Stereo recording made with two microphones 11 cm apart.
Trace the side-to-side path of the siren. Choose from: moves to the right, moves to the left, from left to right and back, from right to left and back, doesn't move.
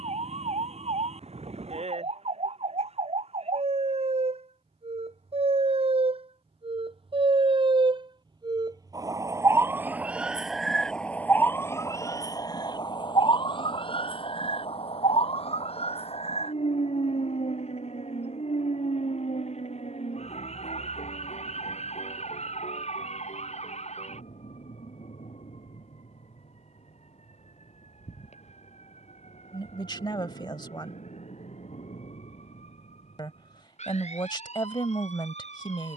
moves to the left.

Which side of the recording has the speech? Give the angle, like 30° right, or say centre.
40° left.